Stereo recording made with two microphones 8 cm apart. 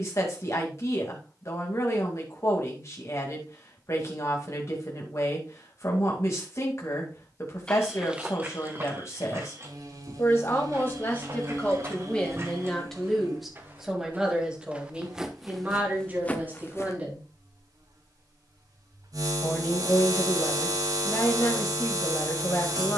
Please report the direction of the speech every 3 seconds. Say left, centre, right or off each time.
left, left, left, left, centre, right, left, left.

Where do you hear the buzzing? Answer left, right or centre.
right.